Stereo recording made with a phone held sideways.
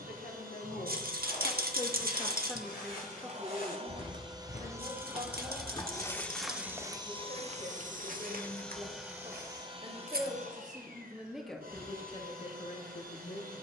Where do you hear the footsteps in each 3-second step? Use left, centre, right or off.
left, left, right, right, off.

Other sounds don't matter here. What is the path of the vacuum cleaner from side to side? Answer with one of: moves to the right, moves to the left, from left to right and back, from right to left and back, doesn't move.
from right to left and back.